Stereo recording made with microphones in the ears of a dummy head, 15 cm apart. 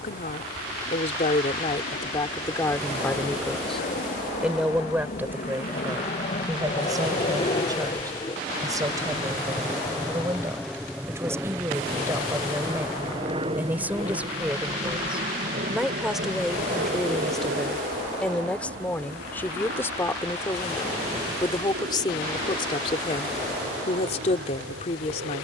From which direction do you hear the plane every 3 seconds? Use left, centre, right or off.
left, left, left, centre, right, right, right, right, right.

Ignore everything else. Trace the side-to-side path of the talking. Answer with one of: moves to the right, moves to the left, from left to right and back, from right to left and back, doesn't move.
from left to right and back.